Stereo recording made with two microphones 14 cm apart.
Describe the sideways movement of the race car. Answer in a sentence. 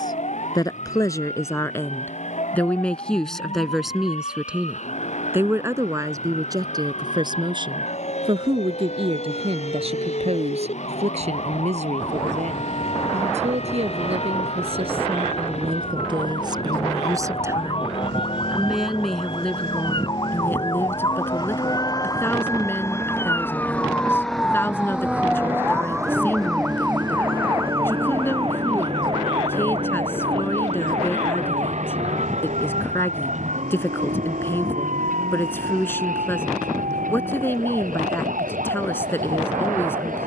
In this clip you hear the race car move to the right.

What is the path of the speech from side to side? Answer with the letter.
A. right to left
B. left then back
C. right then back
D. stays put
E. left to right
C.